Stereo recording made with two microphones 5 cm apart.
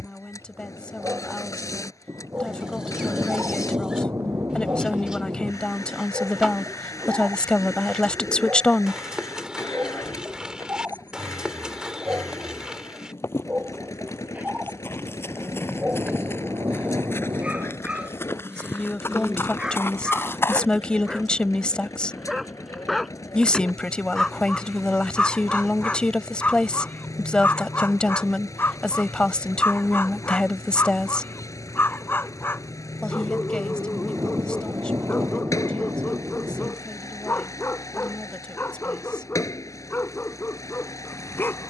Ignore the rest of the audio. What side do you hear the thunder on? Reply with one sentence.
You can hear the thunder on the right.